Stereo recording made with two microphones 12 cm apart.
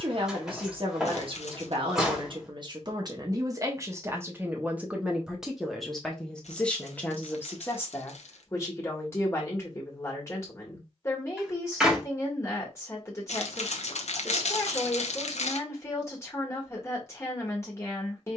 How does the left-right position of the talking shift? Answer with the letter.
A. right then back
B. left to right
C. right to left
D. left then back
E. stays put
C.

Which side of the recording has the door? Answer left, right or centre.
centre.